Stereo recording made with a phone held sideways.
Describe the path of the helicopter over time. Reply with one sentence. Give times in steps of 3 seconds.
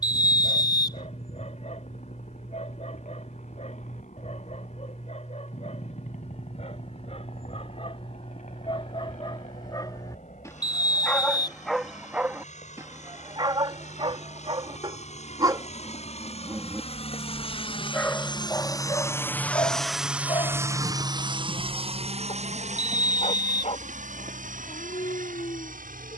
In this clip you hear the helicopter on the left from 0 s, in the centre from 18 s and on the right from 21 s.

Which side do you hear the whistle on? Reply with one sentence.
In this clip you hear the whistle on the left.